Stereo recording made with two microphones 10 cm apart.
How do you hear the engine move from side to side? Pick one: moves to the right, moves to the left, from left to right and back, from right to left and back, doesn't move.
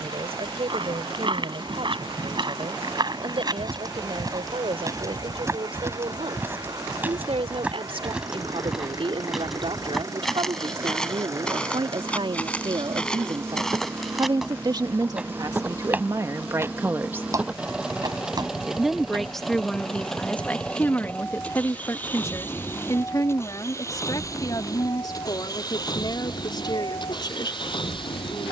moves to the left.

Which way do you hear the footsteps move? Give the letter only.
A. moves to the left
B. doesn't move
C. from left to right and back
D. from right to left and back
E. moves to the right
D.